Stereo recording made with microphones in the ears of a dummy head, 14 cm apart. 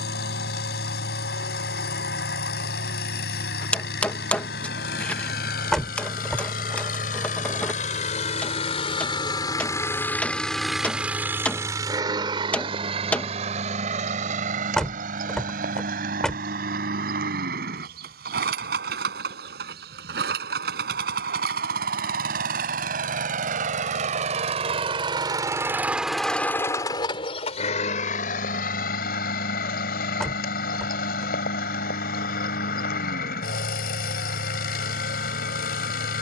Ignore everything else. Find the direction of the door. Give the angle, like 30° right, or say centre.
centre.